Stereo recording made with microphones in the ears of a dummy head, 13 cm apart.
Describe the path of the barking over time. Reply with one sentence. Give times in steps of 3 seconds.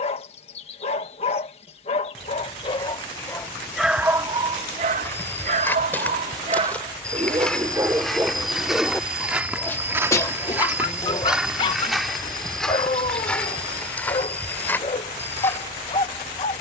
You can hear the barking on the left from 0 s, on the right from 3 s and on the left from 9 s.